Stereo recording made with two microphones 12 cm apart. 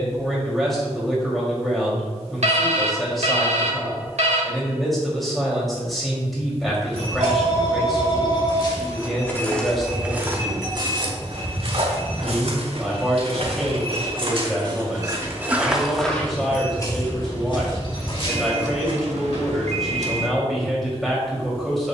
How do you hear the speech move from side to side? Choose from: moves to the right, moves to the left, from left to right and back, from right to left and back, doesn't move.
doesn't move.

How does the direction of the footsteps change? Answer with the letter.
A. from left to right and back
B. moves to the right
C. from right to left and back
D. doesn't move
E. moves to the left
A.